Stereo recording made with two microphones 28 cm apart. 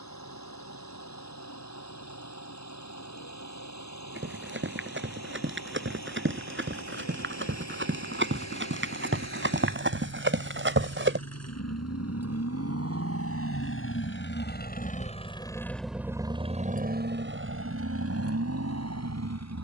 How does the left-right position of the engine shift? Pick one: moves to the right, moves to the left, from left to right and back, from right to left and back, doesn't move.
moves to the right.